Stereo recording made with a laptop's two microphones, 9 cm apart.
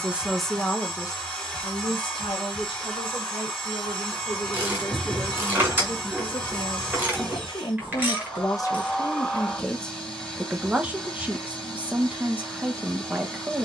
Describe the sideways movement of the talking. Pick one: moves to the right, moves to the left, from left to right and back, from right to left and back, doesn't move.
from right to left and back.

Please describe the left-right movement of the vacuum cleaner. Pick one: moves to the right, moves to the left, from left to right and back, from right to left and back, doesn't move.
doesn't move.